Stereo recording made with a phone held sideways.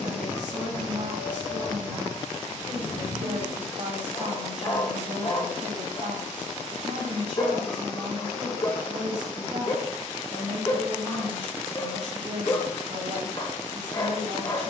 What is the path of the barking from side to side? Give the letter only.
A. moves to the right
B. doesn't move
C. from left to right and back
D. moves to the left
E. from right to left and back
B.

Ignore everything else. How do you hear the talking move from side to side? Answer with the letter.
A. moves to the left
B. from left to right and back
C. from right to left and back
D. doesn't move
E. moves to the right
D.